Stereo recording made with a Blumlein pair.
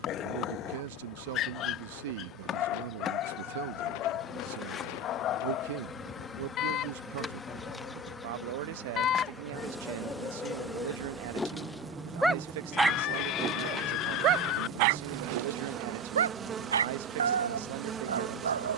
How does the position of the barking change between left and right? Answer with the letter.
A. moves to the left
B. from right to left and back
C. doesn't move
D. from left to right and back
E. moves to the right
E.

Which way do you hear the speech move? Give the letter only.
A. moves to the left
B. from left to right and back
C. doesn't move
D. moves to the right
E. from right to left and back
C.